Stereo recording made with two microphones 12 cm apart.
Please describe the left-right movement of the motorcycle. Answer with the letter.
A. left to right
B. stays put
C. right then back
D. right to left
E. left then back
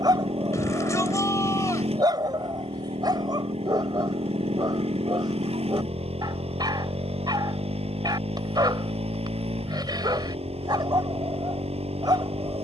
B.